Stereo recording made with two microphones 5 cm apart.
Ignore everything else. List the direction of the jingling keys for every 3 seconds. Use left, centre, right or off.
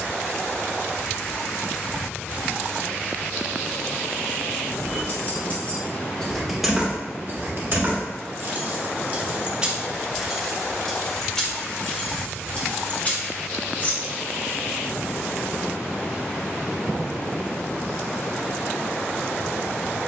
off, left, right, centre, left, off, off.